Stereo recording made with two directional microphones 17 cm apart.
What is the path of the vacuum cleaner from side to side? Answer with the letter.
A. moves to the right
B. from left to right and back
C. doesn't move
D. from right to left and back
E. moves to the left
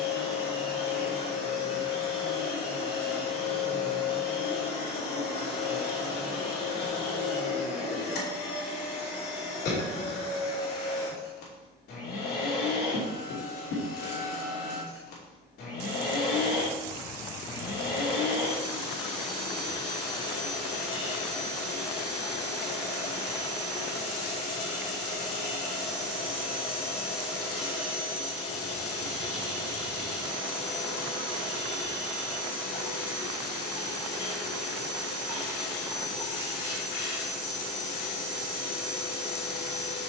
C.